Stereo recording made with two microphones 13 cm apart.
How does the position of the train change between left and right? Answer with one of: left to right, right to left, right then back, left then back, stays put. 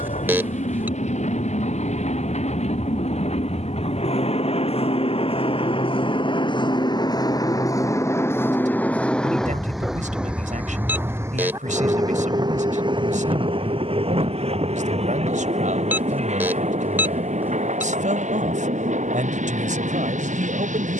left to right.